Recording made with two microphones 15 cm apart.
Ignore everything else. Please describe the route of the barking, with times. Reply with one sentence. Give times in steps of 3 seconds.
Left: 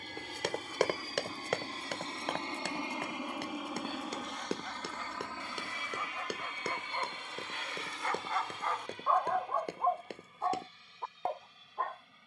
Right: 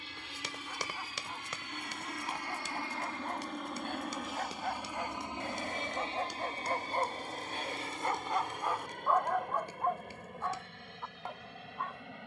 You can hear the barking on the right from 0 s and on the left from 9 s.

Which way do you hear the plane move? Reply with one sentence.
You can hear the plane move to the right.